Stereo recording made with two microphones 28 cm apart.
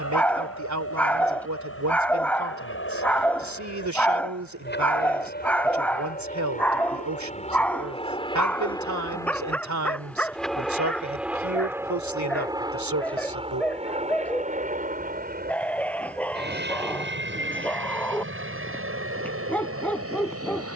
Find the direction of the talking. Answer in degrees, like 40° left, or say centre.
70° right.